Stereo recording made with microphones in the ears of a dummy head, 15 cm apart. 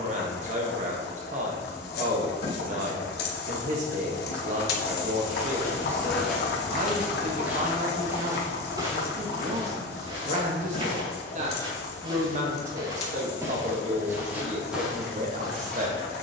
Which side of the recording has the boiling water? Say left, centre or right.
left.